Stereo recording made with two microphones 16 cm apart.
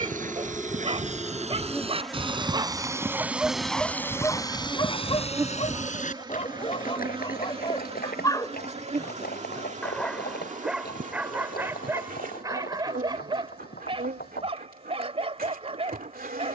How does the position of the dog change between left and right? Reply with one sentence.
You can hear the dog go left and come back.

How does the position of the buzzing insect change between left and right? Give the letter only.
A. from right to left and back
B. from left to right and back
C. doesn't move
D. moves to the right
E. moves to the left
D.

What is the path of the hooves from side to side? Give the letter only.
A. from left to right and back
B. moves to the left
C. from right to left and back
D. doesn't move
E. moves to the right
B.